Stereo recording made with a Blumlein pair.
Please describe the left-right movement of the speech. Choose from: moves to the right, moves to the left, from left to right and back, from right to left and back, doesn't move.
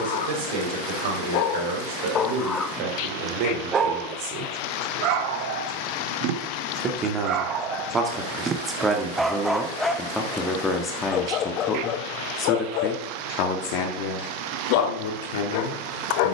moves to the left.